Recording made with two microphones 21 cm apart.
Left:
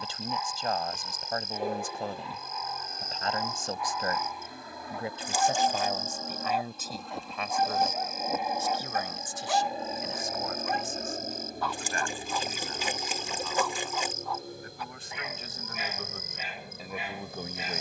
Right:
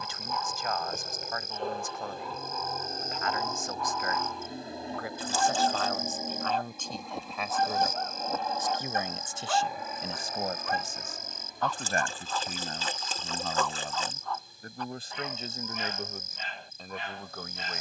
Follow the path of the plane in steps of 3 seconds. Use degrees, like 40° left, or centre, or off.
50° right, 30° right, centre, 30° left, 50° left, 70° left.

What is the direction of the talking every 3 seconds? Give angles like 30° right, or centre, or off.
30° left, 30° left, centre, 40° right, 50° right, 10° right.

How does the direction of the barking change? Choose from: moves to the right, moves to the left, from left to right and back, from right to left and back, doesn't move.
doesn't move.